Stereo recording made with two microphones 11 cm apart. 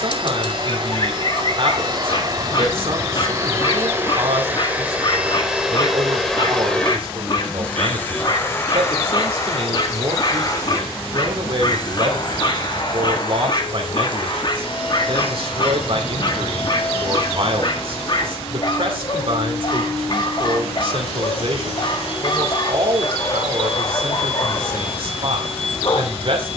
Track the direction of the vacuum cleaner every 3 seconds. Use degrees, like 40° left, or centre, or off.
40° right, 20° right, 10° left, 30° left, 50° left, 60° left, 60° left, 60° left, 70° left.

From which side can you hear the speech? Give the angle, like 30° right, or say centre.
60° right.